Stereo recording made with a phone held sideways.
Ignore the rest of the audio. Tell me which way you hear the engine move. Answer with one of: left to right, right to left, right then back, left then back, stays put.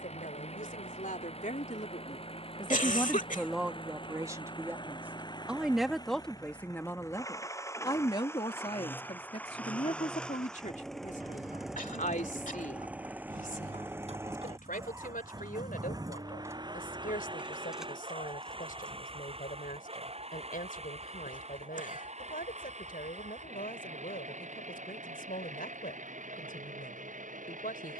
left to right.